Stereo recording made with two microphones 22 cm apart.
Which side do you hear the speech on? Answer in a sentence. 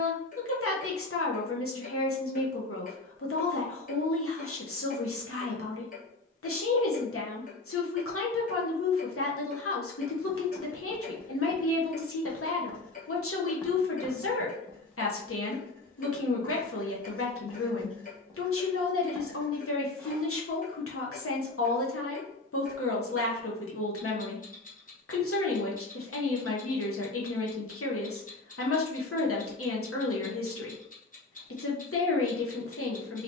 You can hear the speech on the left.